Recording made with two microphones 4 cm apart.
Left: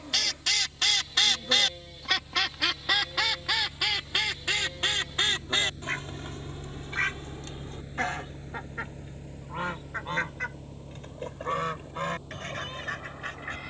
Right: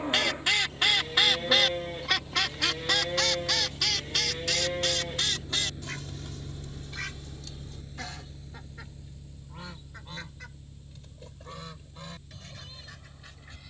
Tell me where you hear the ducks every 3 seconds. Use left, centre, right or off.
centre, left, left, left, left.